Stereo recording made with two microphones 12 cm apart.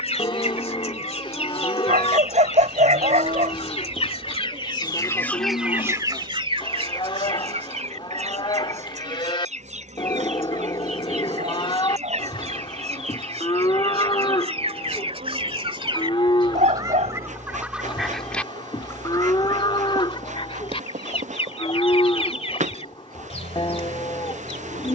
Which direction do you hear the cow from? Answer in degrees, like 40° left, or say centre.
40° left.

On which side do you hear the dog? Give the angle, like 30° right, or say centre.
80° right.